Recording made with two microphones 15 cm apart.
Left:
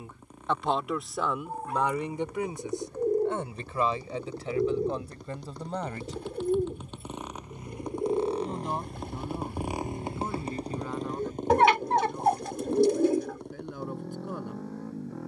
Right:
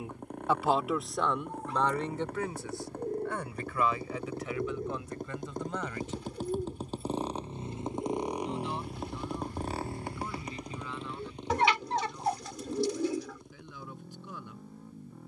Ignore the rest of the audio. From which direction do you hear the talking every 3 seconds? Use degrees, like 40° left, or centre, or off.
10° left, 30° left, 40° left, 50° left, 50° left.